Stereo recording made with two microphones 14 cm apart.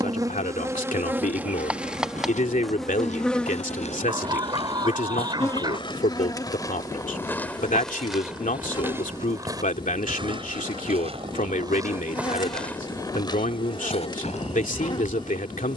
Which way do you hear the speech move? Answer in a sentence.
In this clip you hear the speech stay in one place.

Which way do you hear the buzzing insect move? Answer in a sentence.
You can hear the buzzing insect move from right to left.